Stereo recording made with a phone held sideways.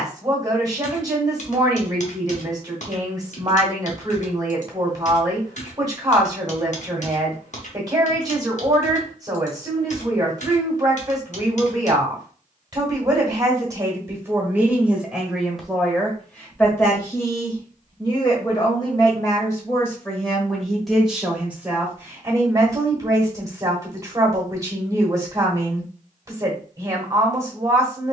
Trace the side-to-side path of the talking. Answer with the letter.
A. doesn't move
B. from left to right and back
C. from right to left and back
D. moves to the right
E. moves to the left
C.